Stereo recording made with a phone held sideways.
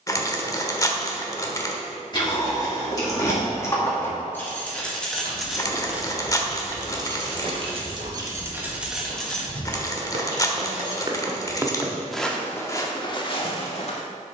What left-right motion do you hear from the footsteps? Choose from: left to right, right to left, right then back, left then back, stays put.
right then back.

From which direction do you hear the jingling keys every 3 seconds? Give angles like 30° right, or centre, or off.
30° left, 10° left, 30° right, 20° left, off.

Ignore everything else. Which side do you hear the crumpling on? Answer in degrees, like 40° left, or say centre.
30° left.